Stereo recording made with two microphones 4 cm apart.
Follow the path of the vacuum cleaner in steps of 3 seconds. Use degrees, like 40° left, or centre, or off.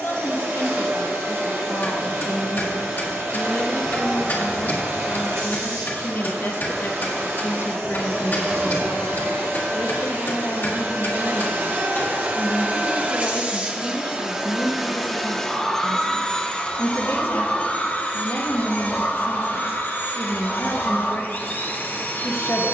70° right, 70° right, 70° right, 60° right, 30° right, 20° left, 50° left, 50° left.